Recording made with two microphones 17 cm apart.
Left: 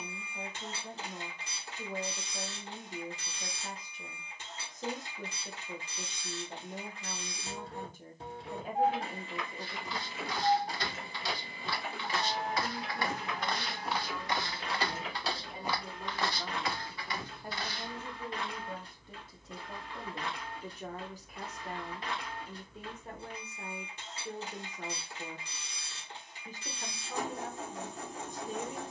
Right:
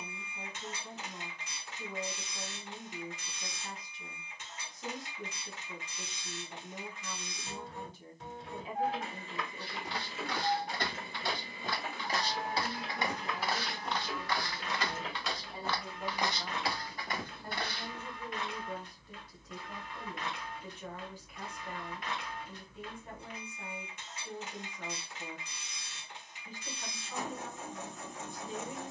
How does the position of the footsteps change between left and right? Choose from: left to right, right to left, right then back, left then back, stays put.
left then back.